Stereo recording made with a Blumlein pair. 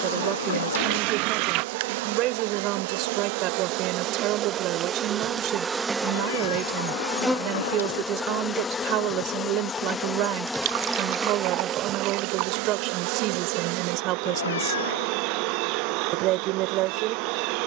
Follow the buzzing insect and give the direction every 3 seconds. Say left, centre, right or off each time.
right, right, centre, centre, right, right.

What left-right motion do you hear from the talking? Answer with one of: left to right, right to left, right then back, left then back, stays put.
stays put.